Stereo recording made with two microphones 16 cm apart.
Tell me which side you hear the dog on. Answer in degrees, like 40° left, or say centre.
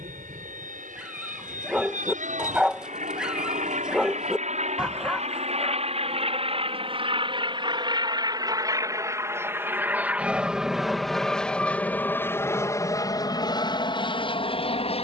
10° right.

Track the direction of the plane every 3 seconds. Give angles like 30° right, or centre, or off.
60° right, 50° right, 30° right, centre, 20° left.